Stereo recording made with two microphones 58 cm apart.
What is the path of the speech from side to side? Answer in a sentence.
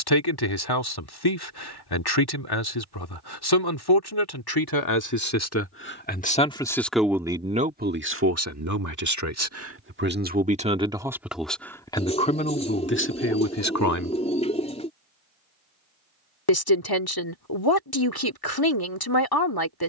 You can hear the speech go right and come back.